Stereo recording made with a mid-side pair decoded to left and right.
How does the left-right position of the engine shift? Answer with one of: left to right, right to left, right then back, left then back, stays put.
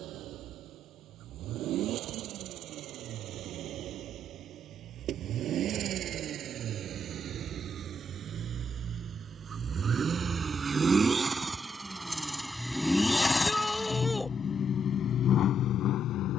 right to left.